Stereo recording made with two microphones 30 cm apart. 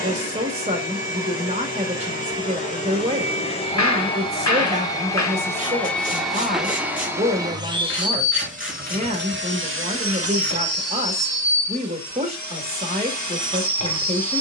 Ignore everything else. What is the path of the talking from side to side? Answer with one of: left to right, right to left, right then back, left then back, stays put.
stays put.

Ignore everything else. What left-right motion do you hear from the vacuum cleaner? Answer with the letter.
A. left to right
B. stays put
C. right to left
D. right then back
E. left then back
A.